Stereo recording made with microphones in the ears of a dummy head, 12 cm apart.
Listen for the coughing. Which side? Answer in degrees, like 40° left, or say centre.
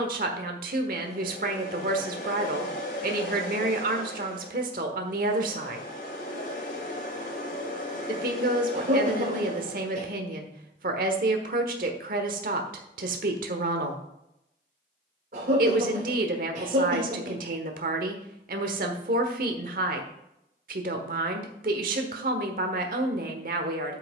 60° right.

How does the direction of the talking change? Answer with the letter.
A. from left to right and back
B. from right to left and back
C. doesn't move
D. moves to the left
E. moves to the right
C.